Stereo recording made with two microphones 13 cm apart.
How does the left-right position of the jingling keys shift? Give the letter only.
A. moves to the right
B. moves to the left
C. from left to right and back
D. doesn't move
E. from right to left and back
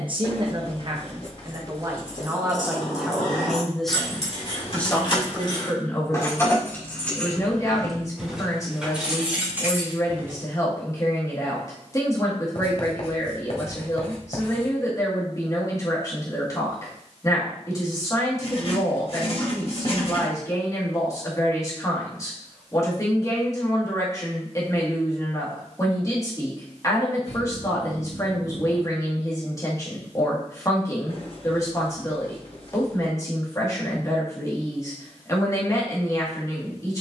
A.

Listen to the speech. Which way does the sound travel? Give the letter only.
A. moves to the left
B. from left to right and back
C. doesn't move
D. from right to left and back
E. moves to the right
A.